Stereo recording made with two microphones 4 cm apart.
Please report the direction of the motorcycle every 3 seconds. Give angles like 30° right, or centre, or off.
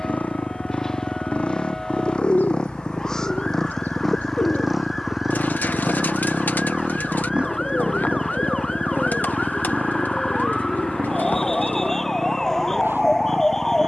30° left, centre, 30° right, 50° right, 60° right.